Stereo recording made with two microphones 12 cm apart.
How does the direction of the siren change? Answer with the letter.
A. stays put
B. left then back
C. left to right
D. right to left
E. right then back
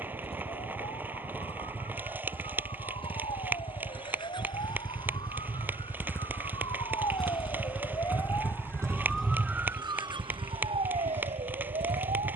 C.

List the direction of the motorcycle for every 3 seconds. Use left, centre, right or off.
left, left, centre, right.